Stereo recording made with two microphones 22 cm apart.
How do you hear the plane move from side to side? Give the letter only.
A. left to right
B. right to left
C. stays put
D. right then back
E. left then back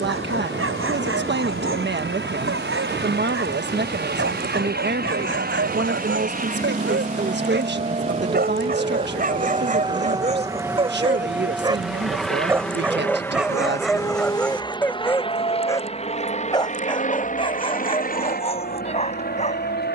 B.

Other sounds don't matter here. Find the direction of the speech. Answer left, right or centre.
right.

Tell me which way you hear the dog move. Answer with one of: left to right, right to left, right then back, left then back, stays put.
right to left.